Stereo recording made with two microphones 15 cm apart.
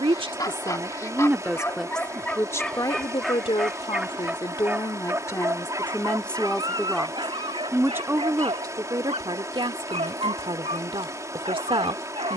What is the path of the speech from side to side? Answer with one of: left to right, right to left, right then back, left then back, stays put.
left then back.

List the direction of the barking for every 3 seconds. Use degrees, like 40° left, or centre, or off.
10° left, 10° right, 30° right, 40° right.